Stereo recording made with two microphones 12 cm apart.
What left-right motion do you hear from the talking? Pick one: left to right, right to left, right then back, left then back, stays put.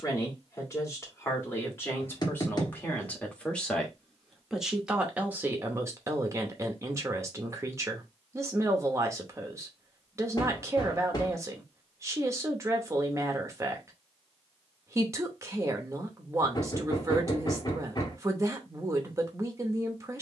left to right.